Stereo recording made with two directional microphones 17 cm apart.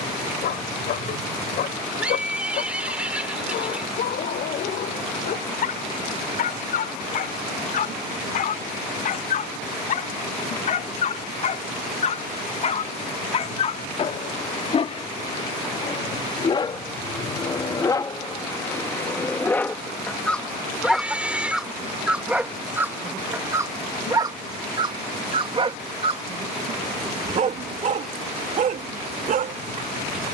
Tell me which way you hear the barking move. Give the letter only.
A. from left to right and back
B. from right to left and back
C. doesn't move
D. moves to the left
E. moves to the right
E.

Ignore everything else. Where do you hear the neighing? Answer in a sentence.
You can hear the neighing in the centre.